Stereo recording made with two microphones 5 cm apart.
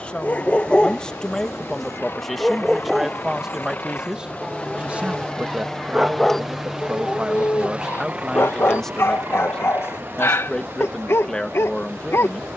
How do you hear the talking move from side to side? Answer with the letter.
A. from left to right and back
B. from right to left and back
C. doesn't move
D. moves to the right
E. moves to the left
A.